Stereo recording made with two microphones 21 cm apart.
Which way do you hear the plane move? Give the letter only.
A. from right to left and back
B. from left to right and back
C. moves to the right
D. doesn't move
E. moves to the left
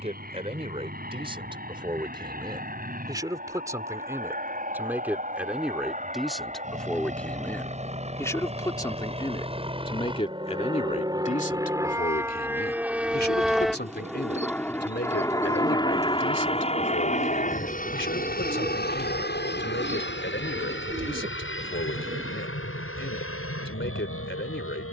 E.